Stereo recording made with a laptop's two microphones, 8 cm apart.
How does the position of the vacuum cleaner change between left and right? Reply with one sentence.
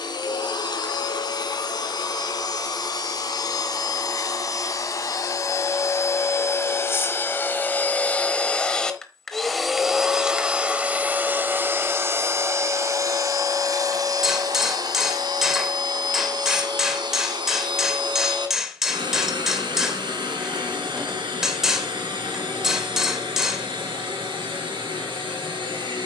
You can hear the vacuum cleaner move from left to right.